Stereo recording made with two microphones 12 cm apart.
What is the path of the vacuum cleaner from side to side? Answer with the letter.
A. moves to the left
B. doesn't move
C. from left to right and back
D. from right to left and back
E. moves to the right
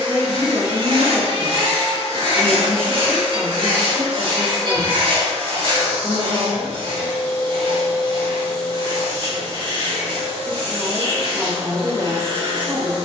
B.